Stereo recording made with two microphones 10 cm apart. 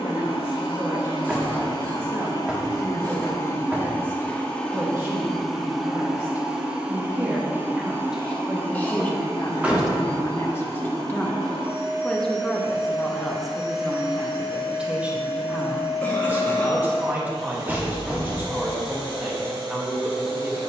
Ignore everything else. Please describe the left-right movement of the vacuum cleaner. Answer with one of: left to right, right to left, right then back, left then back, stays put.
left to right.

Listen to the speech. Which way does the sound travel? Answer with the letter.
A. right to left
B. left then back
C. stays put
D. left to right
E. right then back
B.